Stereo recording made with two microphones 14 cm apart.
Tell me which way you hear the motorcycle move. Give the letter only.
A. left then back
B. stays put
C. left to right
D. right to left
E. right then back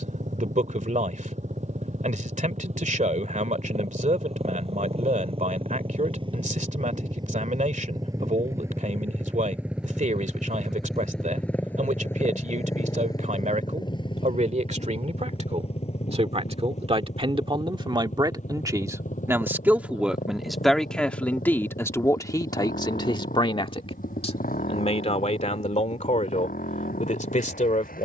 D.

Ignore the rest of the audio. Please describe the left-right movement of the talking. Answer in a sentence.
In this clip you hear the talking go from the right side to the left.